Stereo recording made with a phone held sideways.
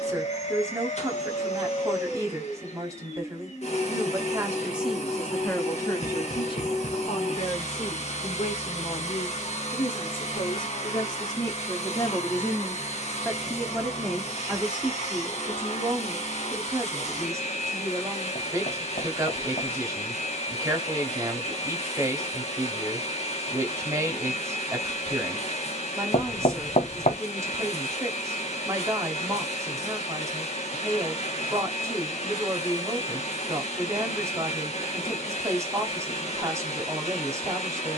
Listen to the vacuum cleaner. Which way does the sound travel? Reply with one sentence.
You can hear the vacuum cleaner stay in one place.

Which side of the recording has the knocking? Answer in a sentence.
In this clip you hear the knocking on the left.